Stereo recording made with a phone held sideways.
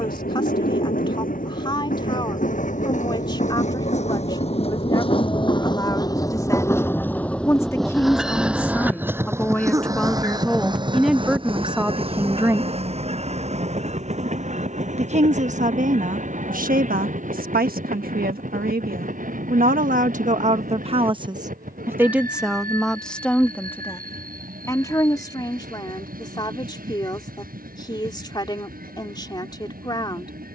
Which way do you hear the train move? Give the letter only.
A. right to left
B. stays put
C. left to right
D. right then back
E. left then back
C.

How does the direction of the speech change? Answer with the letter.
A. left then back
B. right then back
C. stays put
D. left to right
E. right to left
B.